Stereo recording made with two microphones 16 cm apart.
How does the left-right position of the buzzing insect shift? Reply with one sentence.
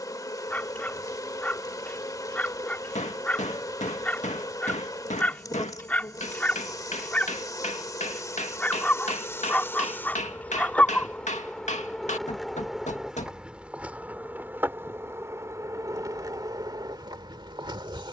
You can hear the buzzing insect travel towards the right.